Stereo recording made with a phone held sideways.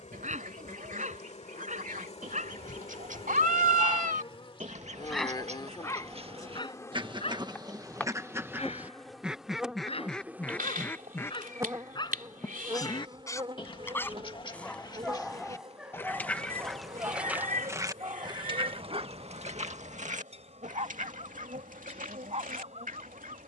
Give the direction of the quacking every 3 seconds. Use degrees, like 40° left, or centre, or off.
70° right, 60° right, 30° right, 10° left, 30° left, centre, 50° right, 70° right.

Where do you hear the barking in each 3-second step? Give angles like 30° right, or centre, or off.
60° right, 20° right, 40° left, 40° left, 20° left, 10° right, 50° right, 50° right.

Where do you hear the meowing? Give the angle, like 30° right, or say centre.
80° right.